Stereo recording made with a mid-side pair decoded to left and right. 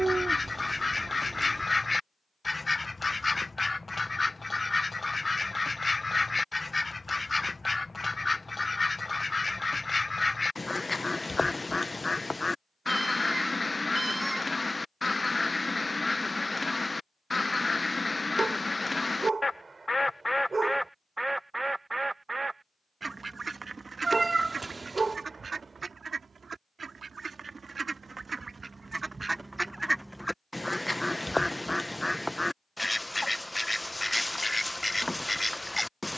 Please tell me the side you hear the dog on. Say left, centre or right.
right.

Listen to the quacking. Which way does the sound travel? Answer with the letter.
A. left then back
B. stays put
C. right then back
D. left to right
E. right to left
C.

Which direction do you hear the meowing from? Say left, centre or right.
right.